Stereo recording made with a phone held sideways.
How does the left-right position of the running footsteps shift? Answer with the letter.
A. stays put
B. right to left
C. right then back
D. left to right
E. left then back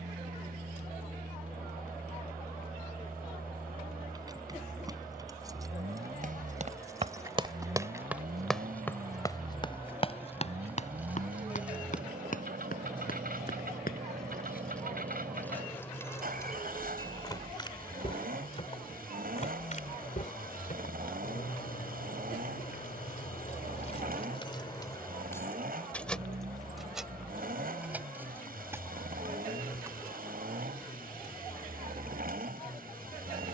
B.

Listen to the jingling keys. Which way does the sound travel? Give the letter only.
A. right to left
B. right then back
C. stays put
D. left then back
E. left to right
D.